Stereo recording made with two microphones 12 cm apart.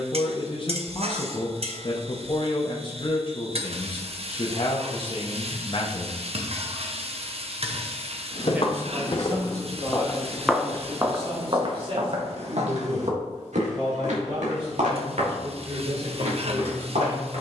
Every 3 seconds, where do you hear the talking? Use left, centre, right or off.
left, left, centre, right, right, right.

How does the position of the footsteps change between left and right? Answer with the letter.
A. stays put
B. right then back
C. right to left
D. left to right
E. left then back
D.